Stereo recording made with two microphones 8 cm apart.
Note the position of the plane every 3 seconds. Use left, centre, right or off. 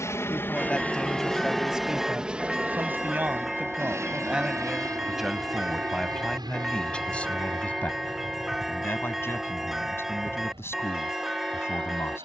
centre, right, right, right.